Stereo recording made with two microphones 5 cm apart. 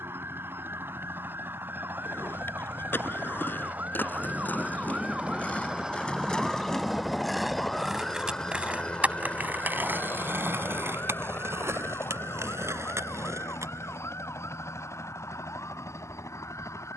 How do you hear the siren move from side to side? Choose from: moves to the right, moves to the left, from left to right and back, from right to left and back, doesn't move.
moves to the left.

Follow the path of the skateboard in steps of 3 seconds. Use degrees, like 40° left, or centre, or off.
50° left, 40° left, centre, 50° right, 70° right, off.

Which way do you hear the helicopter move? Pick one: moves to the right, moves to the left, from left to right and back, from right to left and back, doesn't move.
moves to the left.